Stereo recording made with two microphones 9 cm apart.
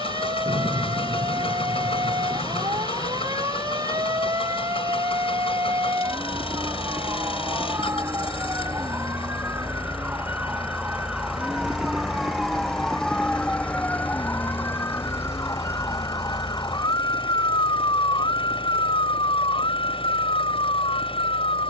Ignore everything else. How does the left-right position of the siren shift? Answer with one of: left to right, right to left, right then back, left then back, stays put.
right to left.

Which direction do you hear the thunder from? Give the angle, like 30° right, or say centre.
40° right.